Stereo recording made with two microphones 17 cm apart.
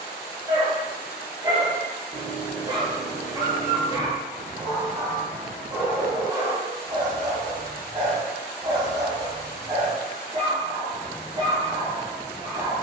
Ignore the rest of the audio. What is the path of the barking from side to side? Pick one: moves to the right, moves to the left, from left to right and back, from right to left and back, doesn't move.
doesn't move.